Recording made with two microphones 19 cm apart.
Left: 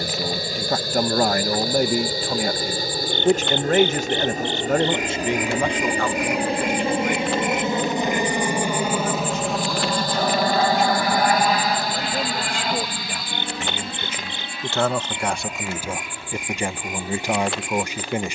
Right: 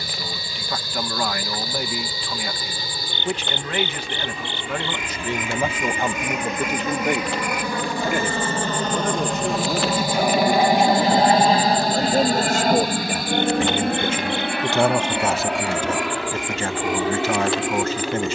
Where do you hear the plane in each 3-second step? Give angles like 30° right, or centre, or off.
50° left, 40° left, 20° left, 10° right, 50° right, 70° right.